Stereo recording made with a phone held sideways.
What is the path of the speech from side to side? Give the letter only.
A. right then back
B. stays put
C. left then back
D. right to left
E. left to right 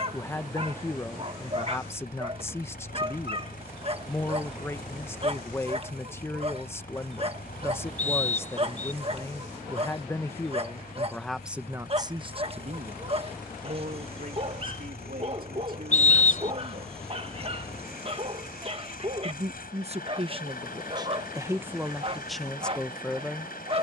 A.